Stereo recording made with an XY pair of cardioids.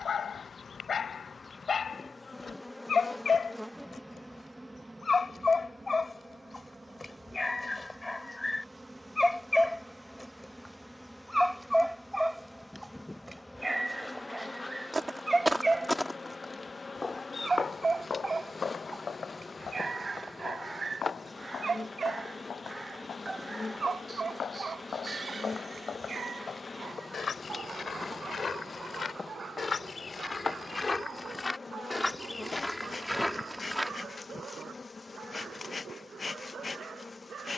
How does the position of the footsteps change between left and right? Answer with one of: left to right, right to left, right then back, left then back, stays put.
left then back.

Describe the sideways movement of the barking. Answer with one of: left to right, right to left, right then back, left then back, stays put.
left to right.